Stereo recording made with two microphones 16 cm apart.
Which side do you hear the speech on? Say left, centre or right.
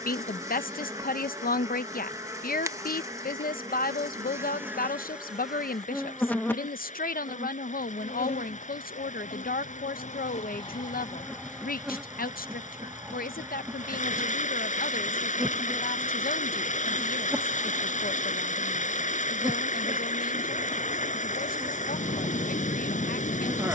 left.